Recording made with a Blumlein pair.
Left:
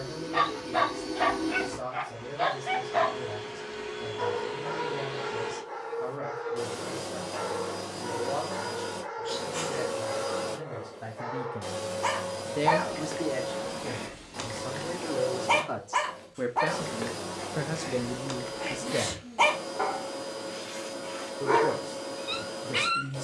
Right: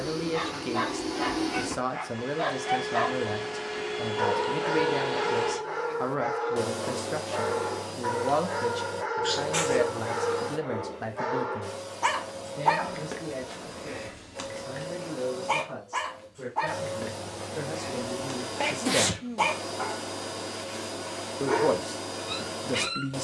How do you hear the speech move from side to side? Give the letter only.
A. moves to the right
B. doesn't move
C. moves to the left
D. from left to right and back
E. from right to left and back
E.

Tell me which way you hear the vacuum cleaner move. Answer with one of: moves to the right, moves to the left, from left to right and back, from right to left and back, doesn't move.
from right to left and back.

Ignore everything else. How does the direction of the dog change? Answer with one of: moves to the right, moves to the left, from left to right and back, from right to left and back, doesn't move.
from left to right and back.